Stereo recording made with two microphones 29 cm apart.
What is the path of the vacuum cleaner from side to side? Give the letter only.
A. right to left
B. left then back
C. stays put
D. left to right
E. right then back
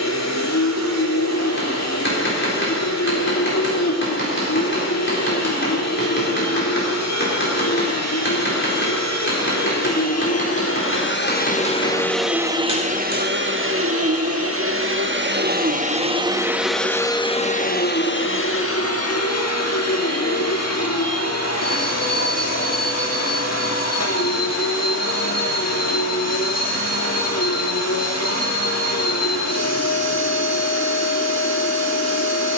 E.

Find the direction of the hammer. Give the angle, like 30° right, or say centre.
40° left.